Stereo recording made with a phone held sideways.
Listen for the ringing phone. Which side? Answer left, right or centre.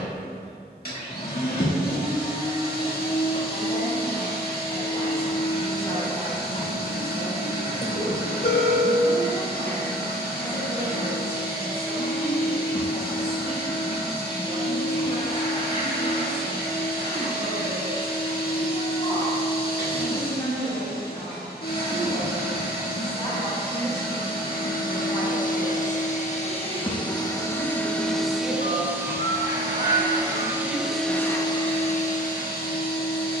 left.